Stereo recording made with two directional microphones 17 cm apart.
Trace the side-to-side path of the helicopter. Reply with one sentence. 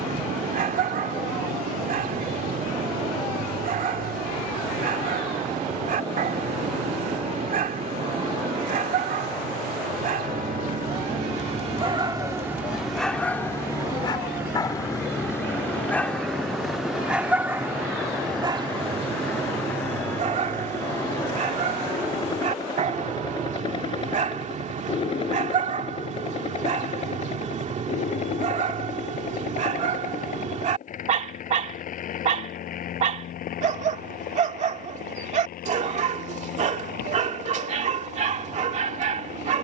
In this clip you hear the helicopter travel towards the left.